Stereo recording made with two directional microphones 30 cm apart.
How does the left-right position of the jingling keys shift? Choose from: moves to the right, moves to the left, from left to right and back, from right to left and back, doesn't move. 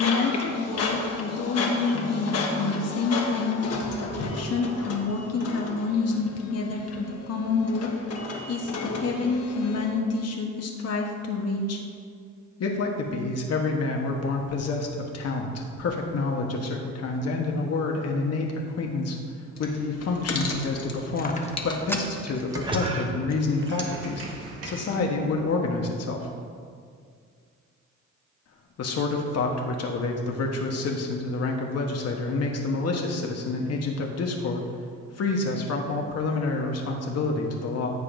moves to the right.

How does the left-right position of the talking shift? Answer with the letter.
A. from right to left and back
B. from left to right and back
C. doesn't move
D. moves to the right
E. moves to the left
C.